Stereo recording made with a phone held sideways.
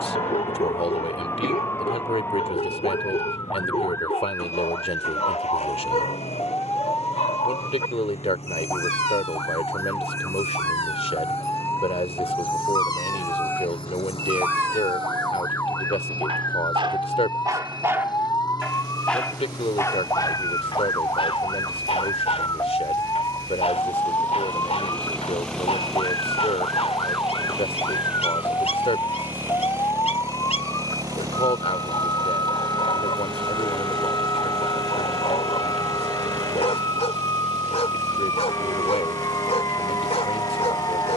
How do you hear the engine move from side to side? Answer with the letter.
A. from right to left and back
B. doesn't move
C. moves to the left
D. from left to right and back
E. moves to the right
E.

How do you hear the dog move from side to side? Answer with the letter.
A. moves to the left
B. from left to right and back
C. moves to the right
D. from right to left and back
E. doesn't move
B.